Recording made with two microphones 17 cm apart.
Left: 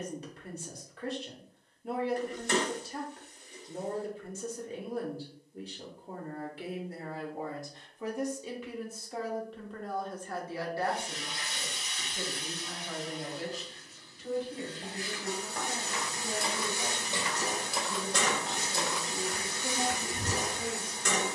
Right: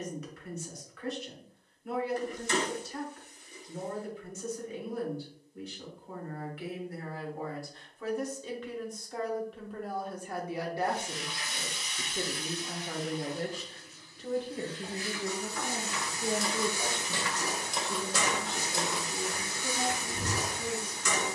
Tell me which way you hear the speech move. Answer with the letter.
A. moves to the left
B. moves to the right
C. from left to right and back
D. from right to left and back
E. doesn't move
C.